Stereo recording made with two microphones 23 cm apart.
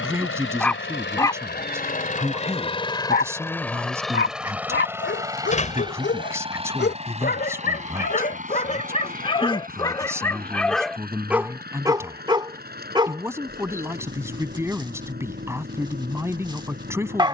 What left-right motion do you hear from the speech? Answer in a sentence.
In this clip you hear the speech stay in one place.